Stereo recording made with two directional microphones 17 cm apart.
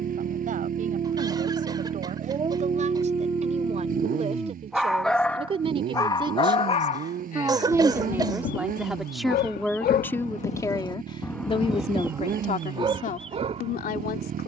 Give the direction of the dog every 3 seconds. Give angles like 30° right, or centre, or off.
40° right, 10° right, 50° left, 40° left, 30° right.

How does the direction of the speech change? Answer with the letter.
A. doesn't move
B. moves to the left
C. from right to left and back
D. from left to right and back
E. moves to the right
B.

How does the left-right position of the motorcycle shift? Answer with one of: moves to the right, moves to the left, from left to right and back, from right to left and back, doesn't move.
doesn't move.